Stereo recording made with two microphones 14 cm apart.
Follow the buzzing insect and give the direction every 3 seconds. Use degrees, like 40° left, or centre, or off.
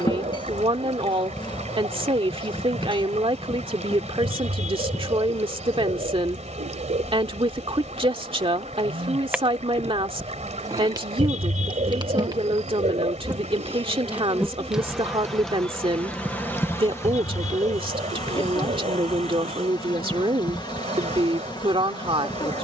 30° left, 30° left, 10° left, 20° right, 20° right, 10° left, 30° left, 30° left.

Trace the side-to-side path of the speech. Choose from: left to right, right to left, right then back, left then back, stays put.
stays put.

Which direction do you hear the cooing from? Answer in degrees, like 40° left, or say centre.
60° right.